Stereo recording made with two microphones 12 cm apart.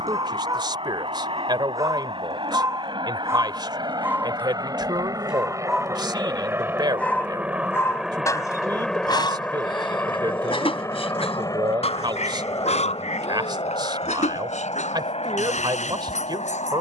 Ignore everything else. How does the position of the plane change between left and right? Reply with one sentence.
You can hear the plane travel towards the left.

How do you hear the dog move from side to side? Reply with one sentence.
You can hear the dog move to the left.